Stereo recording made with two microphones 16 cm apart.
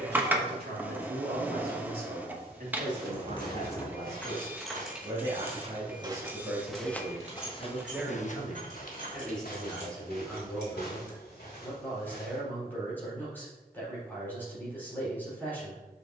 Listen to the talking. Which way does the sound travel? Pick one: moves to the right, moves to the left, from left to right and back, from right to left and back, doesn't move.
moves to the left.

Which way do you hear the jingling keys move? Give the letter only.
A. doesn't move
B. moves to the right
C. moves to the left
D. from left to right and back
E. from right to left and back
B.